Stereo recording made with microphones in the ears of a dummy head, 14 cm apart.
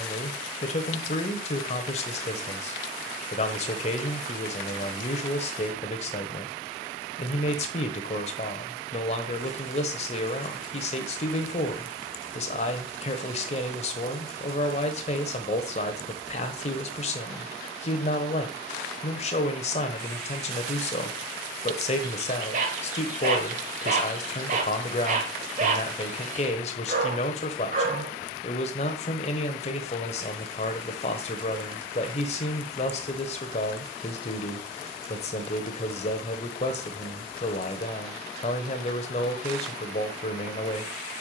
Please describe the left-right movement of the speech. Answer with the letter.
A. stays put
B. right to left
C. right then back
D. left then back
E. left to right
A.